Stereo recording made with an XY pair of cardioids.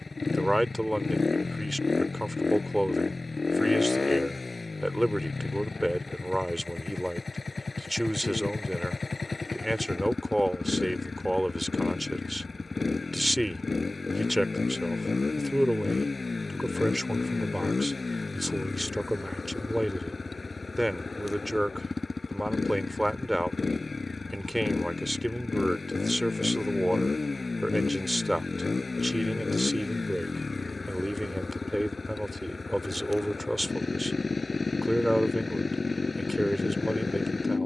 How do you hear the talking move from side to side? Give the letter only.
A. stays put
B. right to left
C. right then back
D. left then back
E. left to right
A.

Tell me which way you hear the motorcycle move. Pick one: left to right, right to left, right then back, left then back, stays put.
stays put.